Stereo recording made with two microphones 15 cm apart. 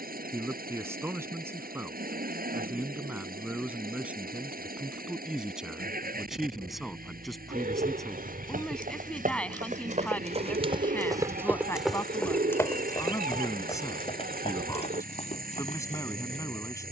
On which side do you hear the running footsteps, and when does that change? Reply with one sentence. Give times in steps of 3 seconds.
You can hear the running footsteps not at all from 0 s, on the right from 6 s and on the left from 12 s.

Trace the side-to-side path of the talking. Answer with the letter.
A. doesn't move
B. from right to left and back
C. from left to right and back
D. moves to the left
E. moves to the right
D.